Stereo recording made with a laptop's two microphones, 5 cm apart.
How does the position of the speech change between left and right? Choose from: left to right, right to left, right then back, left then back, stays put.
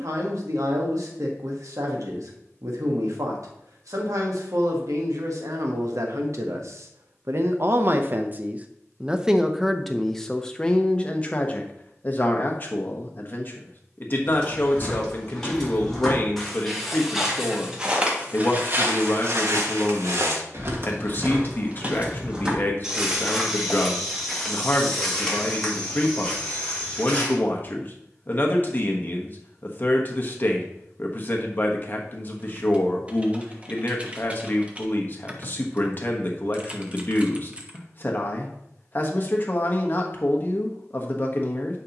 right to left.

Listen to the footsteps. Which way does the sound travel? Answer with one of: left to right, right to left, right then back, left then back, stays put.
right then back.